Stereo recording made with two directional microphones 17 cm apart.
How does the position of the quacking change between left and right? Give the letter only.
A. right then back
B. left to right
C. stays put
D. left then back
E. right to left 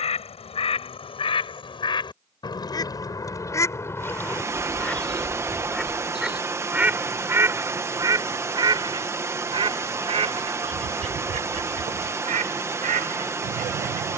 B.